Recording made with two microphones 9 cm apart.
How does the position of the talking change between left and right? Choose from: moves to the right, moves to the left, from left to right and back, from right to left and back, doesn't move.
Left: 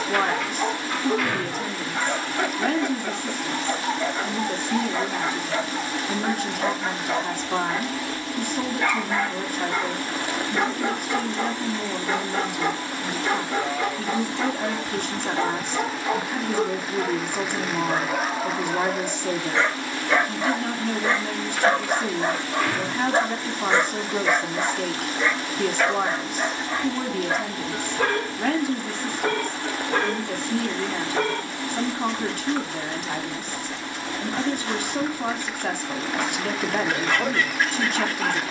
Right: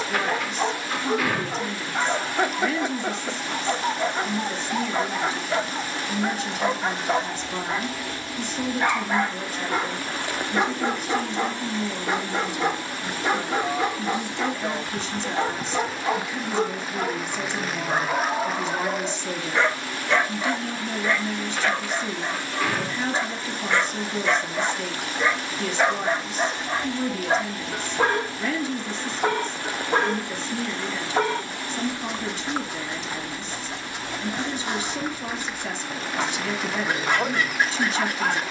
doesn't move.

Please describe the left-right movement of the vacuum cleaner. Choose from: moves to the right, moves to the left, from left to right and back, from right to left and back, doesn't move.
doesn't move.